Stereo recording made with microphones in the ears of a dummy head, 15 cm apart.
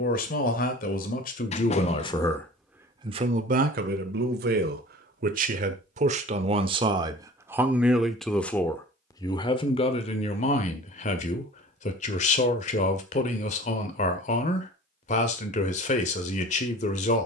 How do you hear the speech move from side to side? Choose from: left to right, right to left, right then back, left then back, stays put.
right then back.